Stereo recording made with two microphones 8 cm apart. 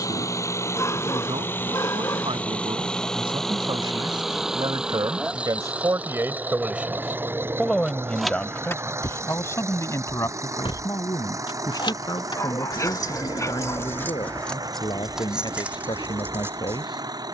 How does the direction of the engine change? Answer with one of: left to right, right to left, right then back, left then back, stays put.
left to right.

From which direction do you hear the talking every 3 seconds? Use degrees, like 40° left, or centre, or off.
70° right, 60° right, centre, 40° left, 50° left, 60° left.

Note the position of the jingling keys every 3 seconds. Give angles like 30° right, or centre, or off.
off, off, 10° left, 70° left, 30° left, 20° right.